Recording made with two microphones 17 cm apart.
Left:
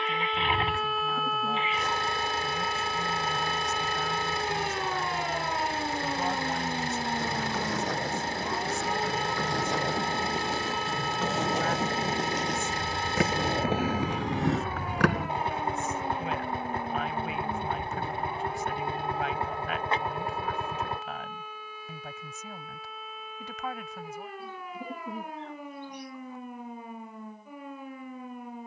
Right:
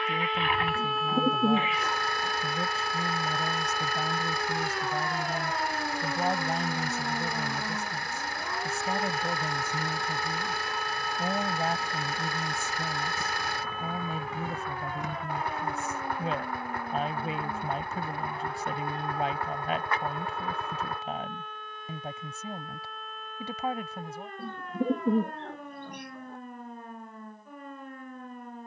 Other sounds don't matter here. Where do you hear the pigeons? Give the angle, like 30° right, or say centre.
60° right.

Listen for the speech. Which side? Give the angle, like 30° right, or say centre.
30° right.